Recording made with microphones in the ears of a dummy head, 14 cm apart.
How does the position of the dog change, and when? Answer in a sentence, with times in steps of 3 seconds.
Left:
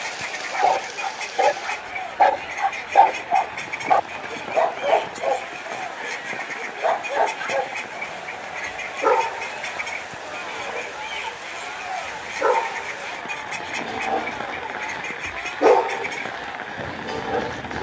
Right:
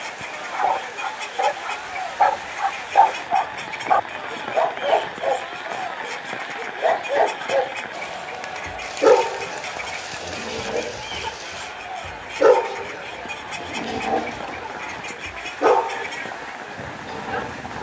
You can hear the dog on the left from 0 s, in the centre from 3 s, on the right from 6 s and on the left from 15 s.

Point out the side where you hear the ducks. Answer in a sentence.
In this clip you hear the ducks in the centre.